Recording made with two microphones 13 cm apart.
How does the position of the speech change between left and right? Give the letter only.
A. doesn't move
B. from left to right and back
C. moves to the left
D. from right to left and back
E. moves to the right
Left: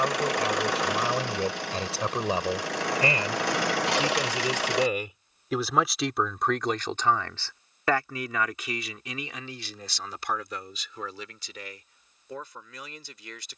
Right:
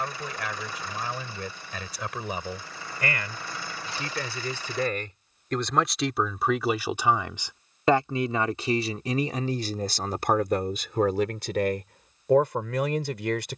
E.